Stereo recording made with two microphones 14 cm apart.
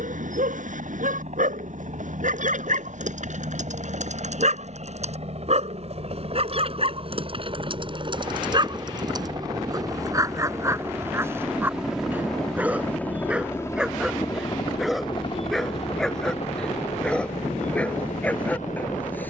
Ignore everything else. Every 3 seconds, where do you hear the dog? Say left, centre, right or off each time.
right, right, right, right, centre, centre, centre.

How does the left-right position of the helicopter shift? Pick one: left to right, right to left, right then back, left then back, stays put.
right to left.